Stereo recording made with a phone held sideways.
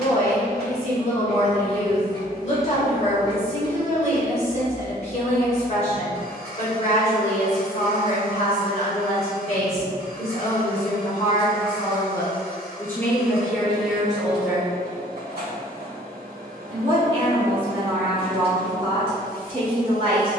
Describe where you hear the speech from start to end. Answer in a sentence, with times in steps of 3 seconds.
In this clip you hear the speech on the left from 0 s, in the centre from 12 s and on the right from 15 s.